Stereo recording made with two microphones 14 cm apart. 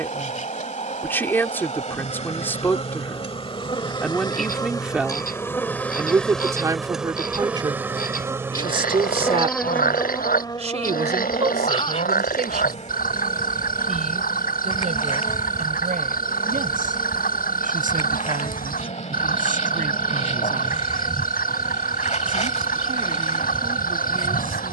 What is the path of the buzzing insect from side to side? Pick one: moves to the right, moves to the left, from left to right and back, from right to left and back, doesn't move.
from left to right and back.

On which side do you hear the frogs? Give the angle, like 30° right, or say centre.
90° left.